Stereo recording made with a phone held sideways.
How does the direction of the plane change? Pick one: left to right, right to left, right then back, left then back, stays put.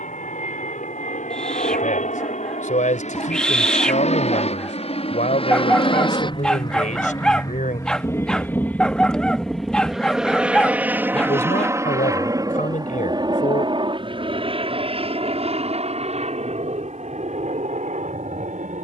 left to right.